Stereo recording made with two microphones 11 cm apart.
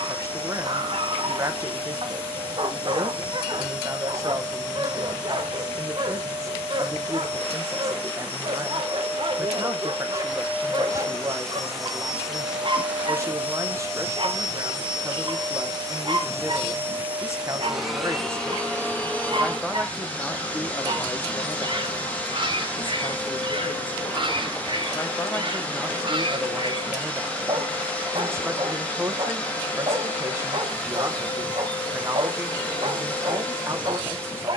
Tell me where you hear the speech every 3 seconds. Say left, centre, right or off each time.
right, right, right, right, right, right, centre, left, centre, right, right, right.